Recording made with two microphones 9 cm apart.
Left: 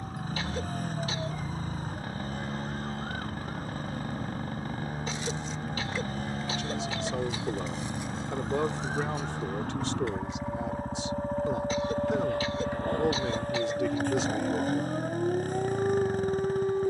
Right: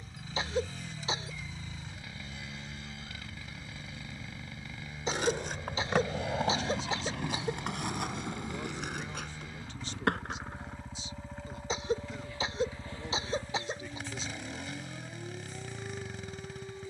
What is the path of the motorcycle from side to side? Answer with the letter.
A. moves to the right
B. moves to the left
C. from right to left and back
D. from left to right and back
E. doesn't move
E.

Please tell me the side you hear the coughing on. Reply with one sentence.
You can hear the coughing on the right.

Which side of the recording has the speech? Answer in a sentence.
You can hear the speech on the left.